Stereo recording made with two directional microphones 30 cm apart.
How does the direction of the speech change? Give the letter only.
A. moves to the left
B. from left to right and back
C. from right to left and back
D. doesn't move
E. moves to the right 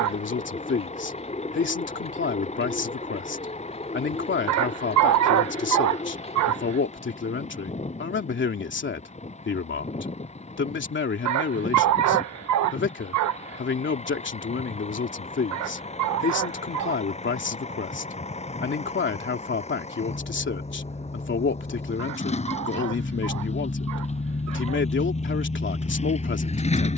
D.